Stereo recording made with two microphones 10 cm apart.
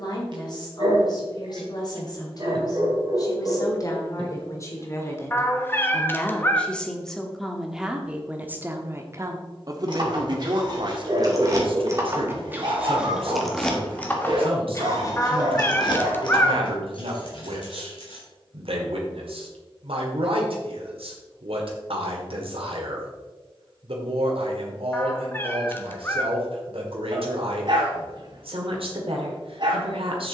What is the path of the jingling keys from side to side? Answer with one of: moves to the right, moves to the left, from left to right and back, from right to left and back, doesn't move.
moves to the left.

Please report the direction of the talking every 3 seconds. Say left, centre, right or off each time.
left, left, centre, right, right, right, right, right, right, right.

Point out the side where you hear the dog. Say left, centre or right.
right.